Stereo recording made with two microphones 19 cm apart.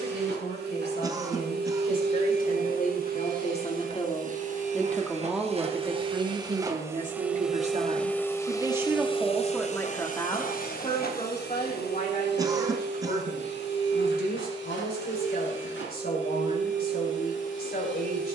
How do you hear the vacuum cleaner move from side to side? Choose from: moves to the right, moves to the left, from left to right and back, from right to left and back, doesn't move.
moves to the left.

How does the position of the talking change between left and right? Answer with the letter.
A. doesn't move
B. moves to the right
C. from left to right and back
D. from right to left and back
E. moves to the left
C.